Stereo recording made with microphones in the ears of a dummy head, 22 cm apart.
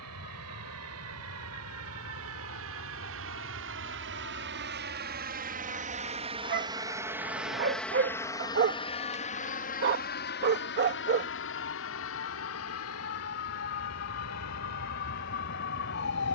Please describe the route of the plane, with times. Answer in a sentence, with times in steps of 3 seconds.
In this clip you hear the plane on the right from 0 s, in the centre from 6 s and on the left from 9 s.